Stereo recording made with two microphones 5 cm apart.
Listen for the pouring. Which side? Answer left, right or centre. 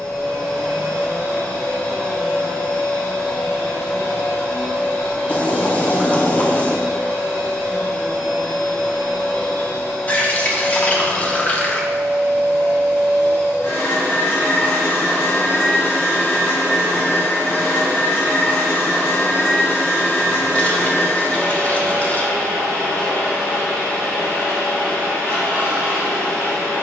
left.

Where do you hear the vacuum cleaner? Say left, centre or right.
left.